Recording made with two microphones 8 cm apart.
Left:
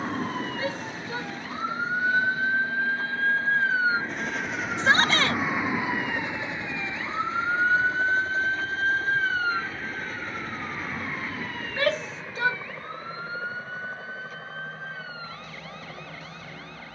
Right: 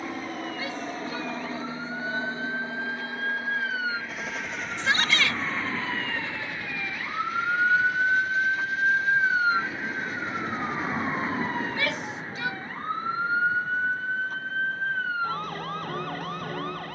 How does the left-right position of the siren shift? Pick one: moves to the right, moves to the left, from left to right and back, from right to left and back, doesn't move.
moves to the right.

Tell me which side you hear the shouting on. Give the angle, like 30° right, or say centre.
40° left.